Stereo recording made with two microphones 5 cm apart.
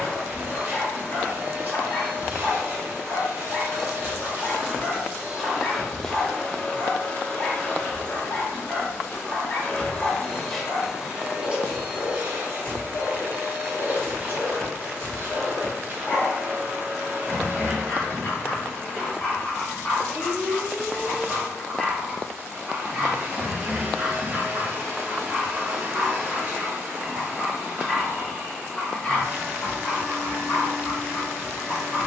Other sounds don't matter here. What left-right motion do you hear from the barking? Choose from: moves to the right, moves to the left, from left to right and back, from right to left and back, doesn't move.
from left to right and back.